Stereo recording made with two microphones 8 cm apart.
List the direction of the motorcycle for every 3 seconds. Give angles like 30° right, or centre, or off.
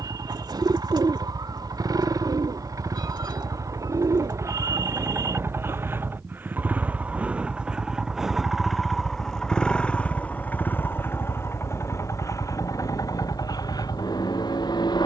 50° right, 40° right, 10° right, 20° left, 40° left.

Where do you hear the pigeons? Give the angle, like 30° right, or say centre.
60° right.